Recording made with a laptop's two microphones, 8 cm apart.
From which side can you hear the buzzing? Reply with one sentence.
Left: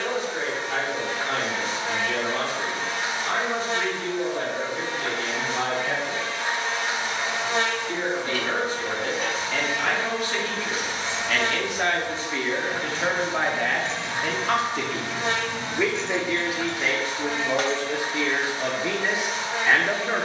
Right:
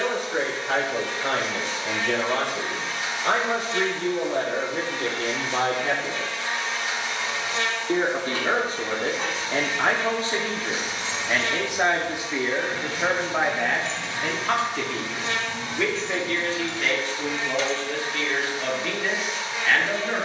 You can hear the buzzing on the left.